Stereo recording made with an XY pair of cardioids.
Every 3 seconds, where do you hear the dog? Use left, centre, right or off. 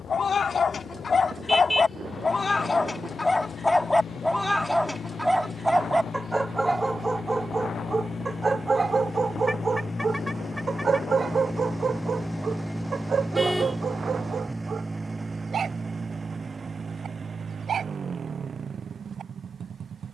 left, centre, right, right, right, right, right.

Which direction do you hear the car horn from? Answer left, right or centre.
centre.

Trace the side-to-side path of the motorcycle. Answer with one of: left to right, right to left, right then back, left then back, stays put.
left to right.